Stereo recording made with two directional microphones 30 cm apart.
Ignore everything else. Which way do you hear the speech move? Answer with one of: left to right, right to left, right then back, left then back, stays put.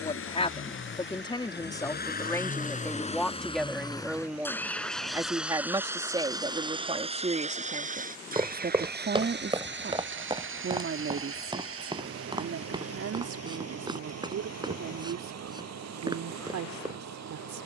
left to right.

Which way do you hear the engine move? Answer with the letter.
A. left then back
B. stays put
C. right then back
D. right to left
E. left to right
E.